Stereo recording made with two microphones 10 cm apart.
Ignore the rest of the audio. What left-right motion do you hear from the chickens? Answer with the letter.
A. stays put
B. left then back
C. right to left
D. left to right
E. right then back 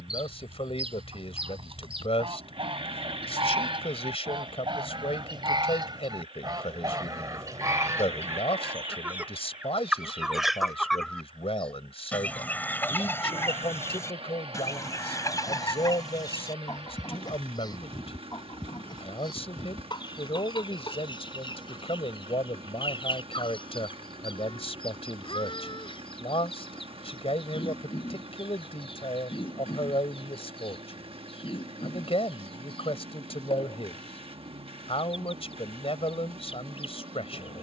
C.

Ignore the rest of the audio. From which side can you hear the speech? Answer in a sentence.
In this clip you hear the speech on the left.